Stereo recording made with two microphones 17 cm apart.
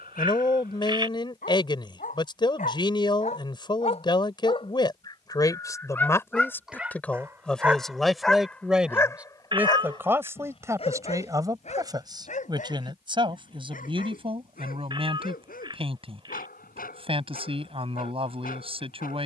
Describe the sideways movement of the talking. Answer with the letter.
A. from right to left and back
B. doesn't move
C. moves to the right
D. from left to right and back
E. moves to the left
C.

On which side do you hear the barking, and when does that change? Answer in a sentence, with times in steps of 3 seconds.
In this clip you hear the barking on the left from 0 s, in the centre from 6 s and on the left from 9 s.